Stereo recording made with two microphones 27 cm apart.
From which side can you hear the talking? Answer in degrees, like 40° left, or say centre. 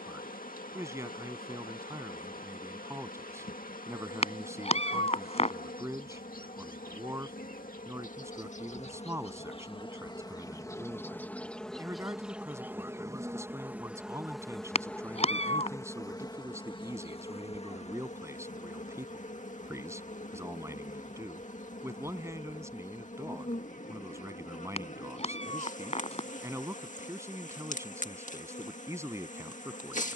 10° right.